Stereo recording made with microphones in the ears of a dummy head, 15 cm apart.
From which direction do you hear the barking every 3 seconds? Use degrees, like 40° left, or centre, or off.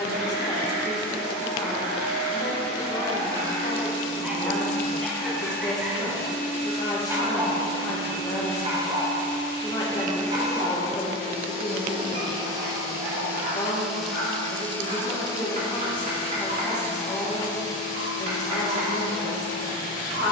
60° right, 10° right, 30° right, 50° right, 60° right, 60° right, 60° right.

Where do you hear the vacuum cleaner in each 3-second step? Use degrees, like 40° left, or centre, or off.
60° left, 40° left, 50° right, 40° right, 10° right, 30° left, 50° left.